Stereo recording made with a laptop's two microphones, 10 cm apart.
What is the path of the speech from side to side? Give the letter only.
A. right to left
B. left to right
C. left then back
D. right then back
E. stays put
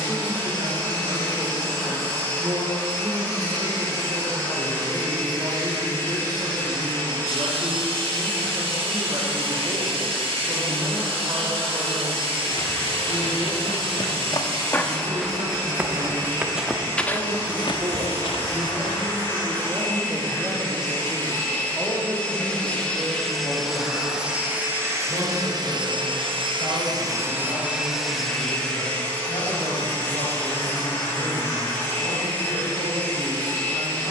A.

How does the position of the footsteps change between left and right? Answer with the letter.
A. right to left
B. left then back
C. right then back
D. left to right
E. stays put
C.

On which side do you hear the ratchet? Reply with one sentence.
You can hear the ratchet on the right.